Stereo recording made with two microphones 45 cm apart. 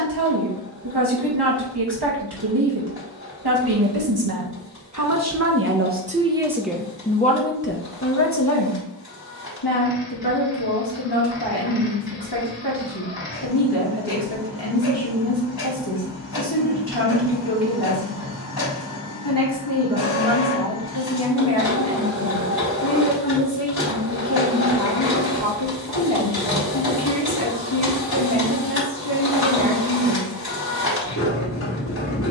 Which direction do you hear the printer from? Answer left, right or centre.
left.